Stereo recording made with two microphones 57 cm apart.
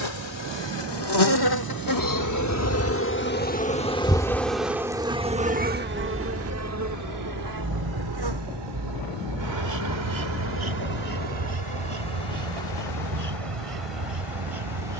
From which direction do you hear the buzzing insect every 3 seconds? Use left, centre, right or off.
left, centre, right, right, right.